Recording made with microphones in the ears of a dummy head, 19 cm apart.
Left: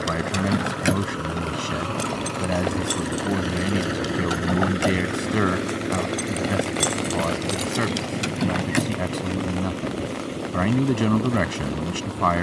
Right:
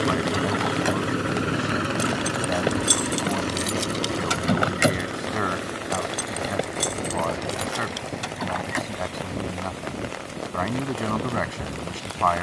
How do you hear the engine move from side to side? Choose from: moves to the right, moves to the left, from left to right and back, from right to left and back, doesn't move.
moves to the left.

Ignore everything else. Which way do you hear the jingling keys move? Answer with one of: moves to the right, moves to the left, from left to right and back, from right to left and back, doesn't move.
from left to right and back.